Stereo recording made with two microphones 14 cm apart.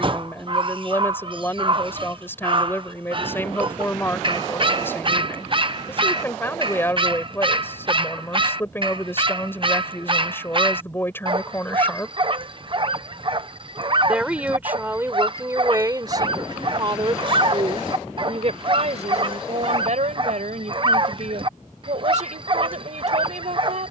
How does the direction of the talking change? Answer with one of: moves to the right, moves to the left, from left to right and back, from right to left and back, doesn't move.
moves to the right.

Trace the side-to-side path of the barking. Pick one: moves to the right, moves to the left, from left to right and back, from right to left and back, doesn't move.
doesn't move.